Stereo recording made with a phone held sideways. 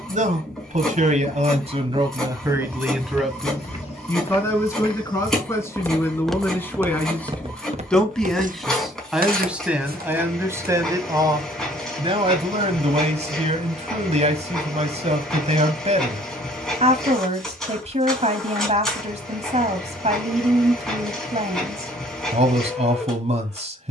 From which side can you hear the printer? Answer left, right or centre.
centre.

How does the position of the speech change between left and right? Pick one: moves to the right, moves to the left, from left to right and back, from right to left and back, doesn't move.
from right to left and back.